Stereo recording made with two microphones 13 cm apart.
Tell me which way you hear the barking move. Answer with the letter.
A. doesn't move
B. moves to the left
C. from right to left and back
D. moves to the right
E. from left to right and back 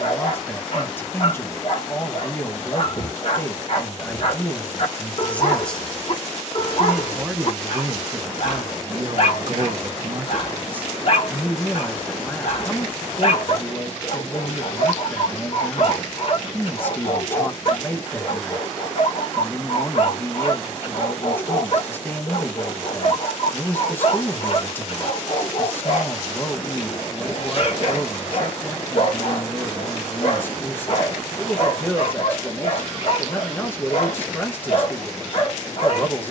A.